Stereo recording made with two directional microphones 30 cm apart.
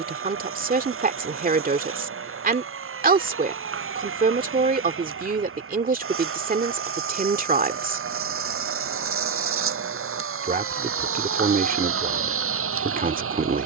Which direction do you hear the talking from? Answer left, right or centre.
right.